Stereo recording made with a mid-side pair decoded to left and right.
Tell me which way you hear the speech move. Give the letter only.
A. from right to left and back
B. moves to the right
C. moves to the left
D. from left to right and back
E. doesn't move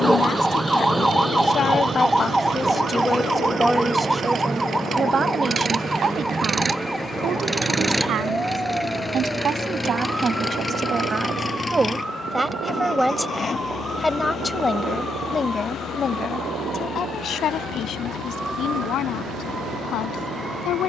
D.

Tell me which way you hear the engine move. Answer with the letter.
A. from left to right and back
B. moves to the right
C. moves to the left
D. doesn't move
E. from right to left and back
C.